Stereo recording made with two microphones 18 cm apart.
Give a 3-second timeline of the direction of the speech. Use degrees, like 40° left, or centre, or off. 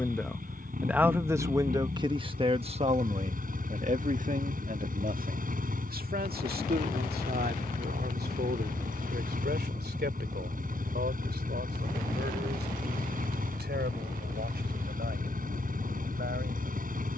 20° right, 50° right, 60° right, 70° right, 70° right, 70° right.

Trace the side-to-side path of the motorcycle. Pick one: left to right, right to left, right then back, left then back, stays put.
stays put.